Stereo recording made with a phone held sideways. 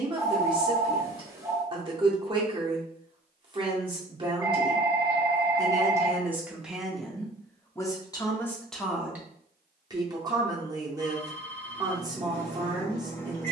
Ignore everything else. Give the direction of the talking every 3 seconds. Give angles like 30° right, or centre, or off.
30° right, 30° right, centre, 20° right, 20° right.